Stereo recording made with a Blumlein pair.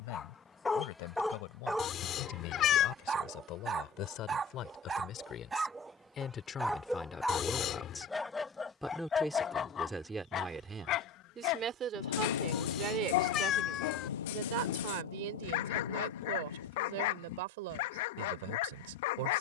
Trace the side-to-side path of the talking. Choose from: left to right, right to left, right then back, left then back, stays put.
left to right.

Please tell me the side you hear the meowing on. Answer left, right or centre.
left.